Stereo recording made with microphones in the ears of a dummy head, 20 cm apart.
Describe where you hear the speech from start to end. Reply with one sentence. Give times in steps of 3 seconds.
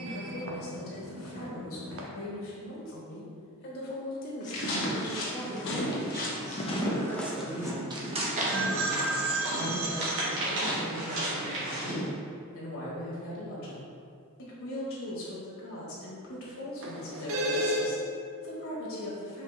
You can hear the speech on the left from 0 s, in the centre from 6 s and on the left from 9 s.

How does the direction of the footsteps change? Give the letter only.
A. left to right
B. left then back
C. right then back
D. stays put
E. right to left
A.